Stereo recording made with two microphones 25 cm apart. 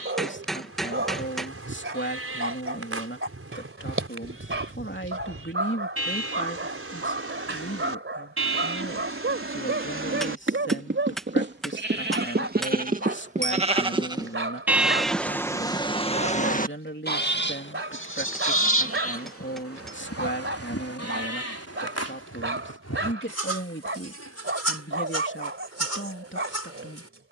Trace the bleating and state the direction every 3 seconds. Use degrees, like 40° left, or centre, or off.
60° right, 60° right, 60° right, 50° right, 30° right, 30° left, 70° left, 80° left, 80° left.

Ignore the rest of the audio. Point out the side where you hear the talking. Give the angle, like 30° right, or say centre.
50° left.